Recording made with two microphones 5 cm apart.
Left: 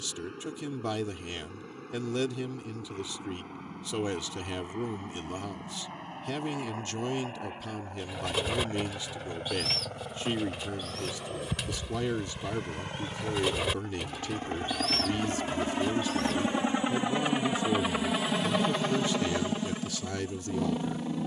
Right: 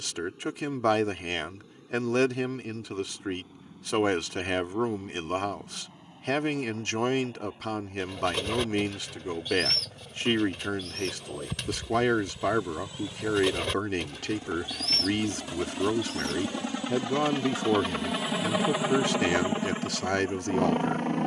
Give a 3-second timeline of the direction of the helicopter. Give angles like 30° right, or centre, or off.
60° left, 60° left, 60° left, 60° left, 50° left, 30° left, 20° right.